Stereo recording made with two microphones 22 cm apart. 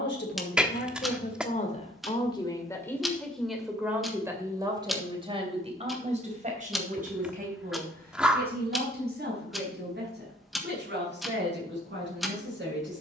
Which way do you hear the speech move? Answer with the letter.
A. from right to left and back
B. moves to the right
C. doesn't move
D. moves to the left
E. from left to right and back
B.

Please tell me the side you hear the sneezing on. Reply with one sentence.
You can hear the sneezing in the centre.